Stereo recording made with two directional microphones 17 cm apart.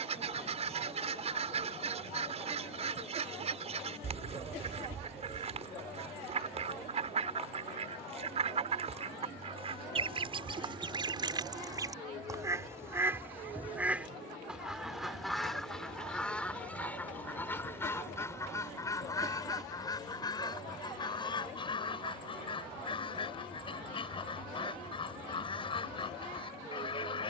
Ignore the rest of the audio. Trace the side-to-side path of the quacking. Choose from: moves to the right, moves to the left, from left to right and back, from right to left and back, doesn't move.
moves to the left.